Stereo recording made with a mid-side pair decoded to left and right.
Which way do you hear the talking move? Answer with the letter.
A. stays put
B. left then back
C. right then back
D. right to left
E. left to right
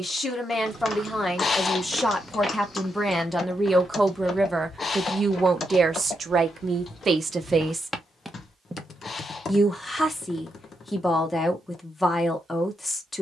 C.